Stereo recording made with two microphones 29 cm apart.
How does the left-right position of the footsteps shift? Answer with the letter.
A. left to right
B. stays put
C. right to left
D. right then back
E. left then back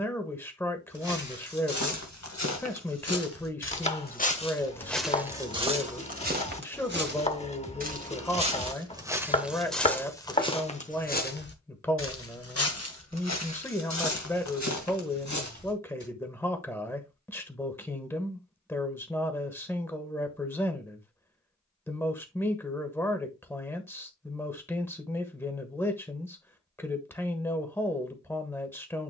D.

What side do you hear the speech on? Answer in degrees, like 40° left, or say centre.
10° left.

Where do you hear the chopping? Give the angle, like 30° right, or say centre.
20° left.